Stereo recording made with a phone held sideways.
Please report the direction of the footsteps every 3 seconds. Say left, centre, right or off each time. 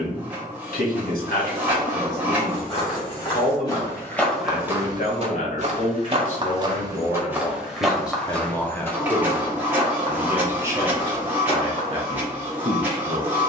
left, centre, centre, left, off.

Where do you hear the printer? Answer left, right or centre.
centre.